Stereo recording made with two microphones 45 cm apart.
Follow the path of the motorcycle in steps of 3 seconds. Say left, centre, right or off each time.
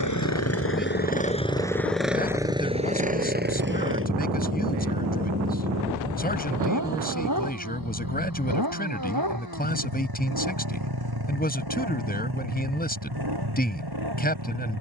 centre, right, right, right, right.